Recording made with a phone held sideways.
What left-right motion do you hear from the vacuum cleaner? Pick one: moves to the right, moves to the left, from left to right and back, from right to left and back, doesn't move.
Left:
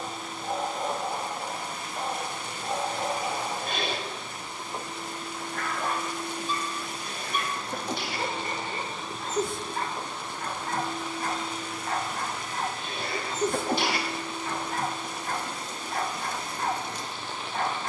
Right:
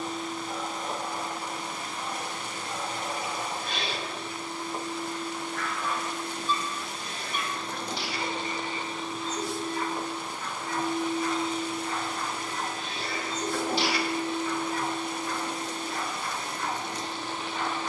moves to the right.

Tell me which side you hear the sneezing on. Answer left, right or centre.
left.